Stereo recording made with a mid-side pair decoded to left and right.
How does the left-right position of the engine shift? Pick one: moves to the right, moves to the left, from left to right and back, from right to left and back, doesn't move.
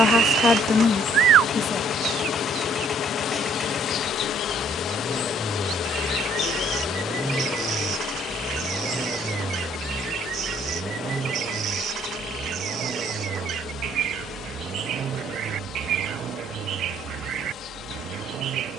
moves to the right.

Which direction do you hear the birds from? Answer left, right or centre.
right.